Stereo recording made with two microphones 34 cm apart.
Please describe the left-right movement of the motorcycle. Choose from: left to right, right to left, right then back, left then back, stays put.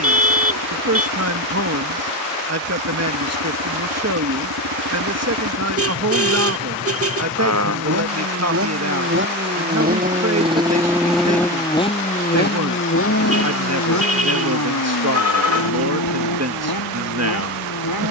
right to left.